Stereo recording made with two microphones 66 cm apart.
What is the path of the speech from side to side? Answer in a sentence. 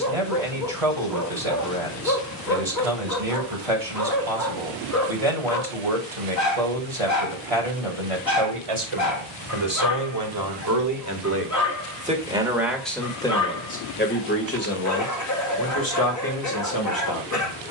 You can hear the speech travel towards the left.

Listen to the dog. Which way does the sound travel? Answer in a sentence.
In this clip you hear the dog stay put.